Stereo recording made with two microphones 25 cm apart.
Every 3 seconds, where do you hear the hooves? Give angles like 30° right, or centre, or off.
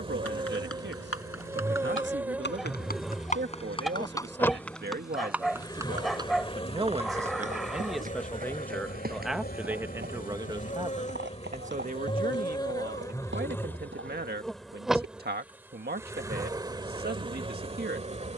60° left, 10° left, 30° right, 40° right, 50° right, off.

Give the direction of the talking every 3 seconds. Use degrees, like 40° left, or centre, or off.
50° right, 40° right, 10° right, 20° right, 40° right, 40° right.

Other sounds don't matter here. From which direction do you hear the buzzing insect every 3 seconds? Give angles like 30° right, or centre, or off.
10° right, 10° left, 30° left, 30° left, 10° left, 10° right.